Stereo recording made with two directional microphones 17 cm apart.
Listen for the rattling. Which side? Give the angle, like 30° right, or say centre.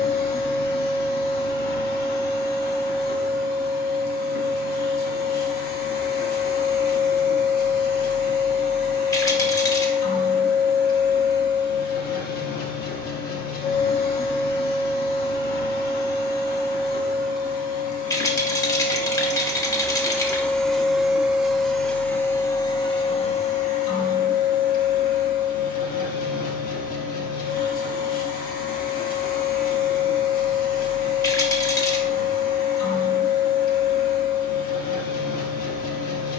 20° left.